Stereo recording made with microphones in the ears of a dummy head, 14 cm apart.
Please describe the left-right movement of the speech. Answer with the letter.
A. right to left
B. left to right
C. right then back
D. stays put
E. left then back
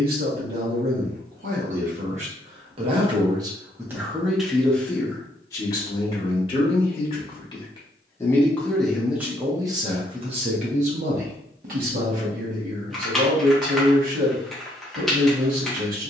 E.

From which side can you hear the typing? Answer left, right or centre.
centre.